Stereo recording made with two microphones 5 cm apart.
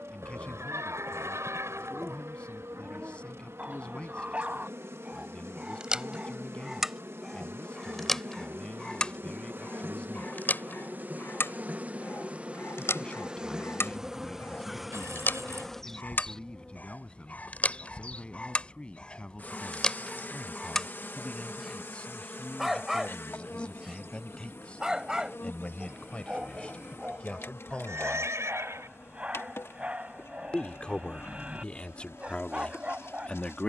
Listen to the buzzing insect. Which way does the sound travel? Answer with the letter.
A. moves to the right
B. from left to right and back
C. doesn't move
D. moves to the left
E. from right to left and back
D.